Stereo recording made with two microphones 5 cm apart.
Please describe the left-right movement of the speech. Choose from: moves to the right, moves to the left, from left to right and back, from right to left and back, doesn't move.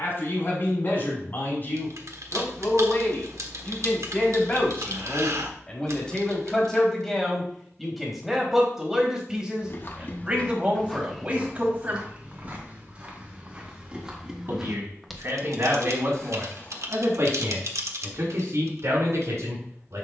moves to the right.